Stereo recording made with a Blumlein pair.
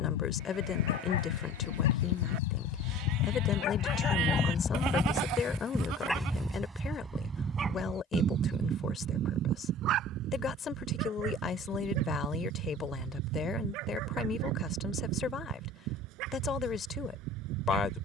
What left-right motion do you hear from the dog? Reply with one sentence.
In this clip you hear the dog move from left to right.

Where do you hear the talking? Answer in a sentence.
In this clip you hear the talking on the left.